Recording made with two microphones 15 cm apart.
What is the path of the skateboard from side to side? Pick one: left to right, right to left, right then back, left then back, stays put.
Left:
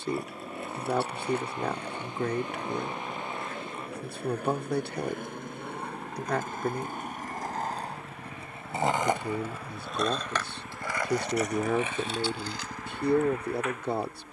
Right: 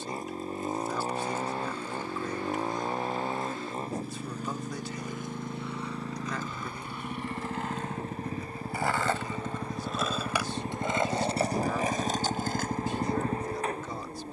left to right.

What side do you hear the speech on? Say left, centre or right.
left.